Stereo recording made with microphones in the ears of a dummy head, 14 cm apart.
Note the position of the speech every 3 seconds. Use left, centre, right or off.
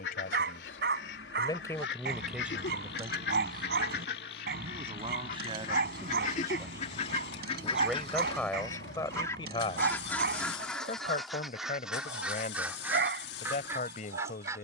left, right, centre, left, left.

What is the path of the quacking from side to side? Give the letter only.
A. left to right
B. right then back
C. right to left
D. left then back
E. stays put
A.